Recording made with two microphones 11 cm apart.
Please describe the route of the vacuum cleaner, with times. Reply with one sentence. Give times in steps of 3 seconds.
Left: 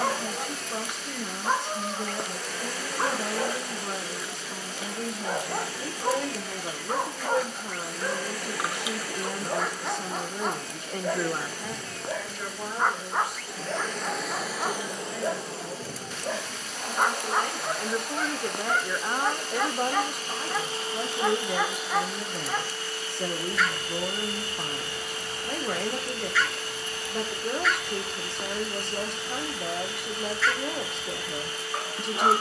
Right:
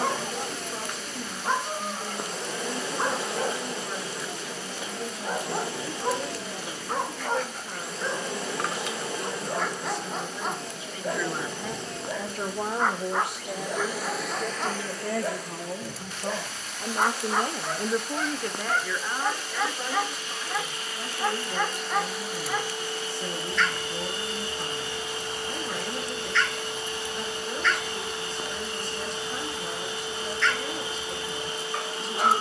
You can hear the vacuum cleaner on the right from 0 s, in the centre from 12 s, on the left from 15 s, in the centre from 21 s and on the right from 24 s.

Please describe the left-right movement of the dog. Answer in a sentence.
You can hear the dog stay put.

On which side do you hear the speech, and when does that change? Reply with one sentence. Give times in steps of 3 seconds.
You can hear the speech on the left from 0 s, on the right from 12 s and on the left from 18 s.